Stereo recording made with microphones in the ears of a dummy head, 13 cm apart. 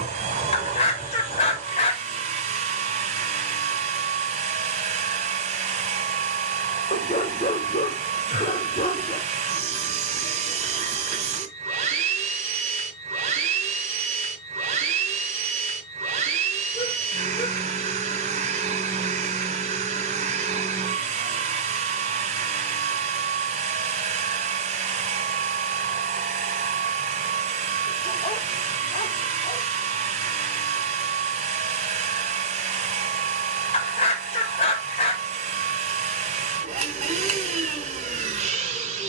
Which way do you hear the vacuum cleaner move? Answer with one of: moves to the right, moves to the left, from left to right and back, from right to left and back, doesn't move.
doesn't move.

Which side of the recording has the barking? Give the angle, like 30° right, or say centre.
40° left.